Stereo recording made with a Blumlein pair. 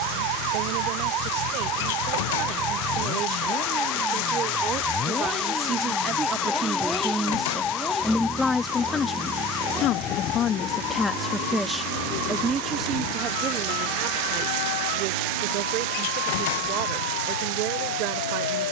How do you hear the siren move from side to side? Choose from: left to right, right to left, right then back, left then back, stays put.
right to left.